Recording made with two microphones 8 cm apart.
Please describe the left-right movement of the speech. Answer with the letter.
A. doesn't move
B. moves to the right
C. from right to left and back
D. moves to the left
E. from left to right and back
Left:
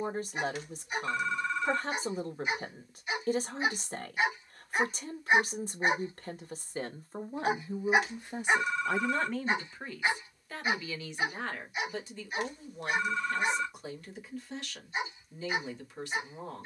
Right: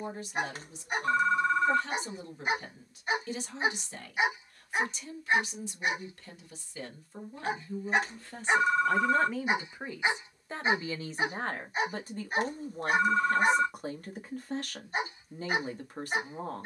B.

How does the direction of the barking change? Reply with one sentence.
You can hear the barking move from right to left and back again.